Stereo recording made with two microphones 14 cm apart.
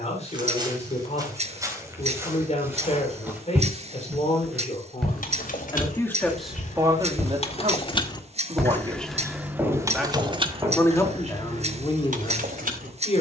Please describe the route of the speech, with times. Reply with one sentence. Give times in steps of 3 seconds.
In this clip you hear the speech on the left from 0 s, on the right from 6 s, in the centre from 9 s and on the left from 12 s.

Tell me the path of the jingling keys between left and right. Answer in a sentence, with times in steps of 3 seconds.
In this clip you hear the jingling keys not at all from 0 s, on the left from 3 s and on the right from 9 s.